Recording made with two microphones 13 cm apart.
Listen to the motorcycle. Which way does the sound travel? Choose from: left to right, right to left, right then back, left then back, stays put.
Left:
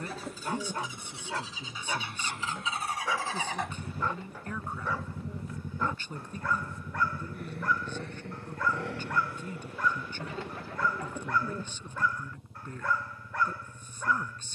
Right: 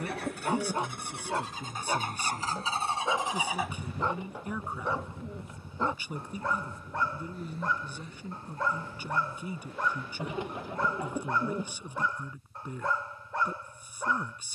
right to left.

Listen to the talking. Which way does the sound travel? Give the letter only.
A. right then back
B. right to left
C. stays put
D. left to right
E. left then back
C.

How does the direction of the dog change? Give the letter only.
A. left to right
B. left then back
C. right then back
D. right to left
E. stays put
E.